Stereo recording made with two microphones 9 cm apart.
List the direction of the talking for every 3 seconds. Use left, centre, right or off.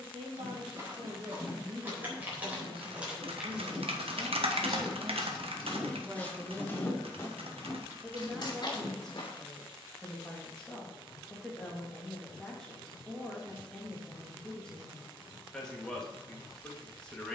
right, right, centre, centre, centre, centre.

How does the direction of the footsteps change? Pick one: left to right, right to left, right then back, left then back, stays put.
right to left.